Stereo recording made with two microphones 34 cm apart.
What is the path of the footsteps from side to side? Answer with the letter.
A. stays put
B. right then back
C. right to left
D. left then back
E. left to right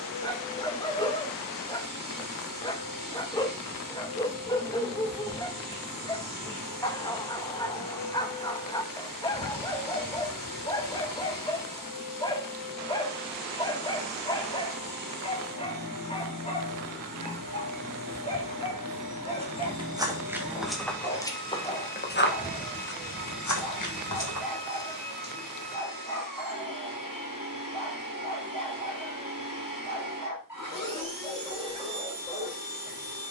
C.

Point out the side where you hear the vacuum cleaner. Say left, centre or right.
left.